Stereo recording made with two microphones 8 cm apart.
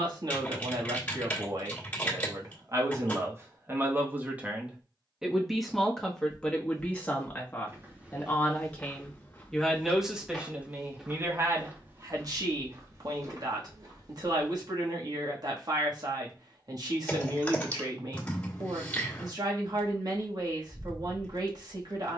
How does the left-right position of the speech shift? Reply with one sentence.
In this clip you hear the speech go left and come back.